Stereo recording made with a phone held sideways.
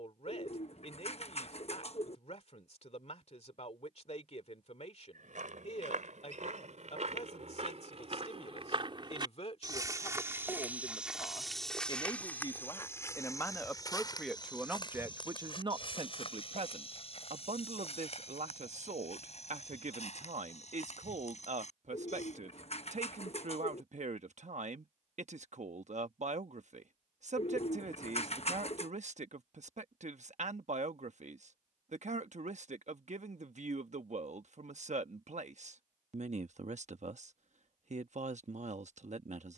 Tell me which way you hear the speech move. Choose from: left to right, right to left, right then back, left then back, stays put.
left to right.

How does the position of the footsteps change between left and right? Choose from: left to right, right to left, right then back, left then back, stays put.
right to left.